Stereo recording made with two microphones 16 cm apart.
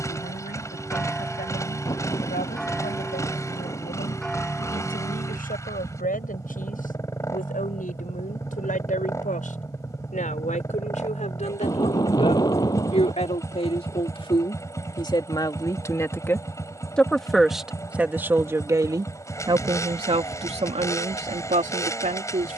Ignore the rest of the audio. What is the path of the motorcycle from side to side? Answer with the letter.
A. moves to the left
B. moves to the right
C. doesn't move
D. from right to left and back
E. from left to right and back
C.